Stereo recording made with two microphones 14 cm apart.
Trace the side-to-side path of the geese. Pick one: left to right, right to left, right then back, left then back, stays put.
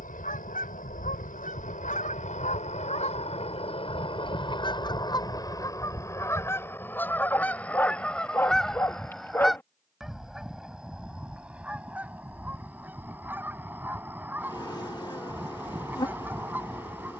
left to right.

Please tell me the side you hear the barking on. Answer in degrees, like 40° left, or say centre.
20° left.